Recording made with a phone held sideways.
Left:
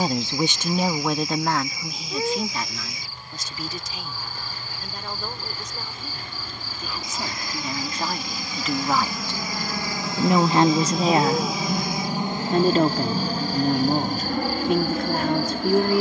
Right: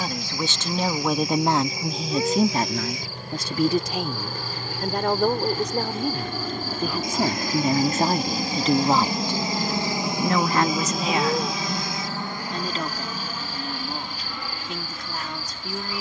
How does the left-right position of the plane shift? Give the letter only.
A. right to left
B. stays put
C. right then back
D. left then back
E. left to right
A.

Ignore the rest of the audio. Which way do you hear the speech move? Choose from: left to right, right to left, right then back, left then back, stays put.
right then back.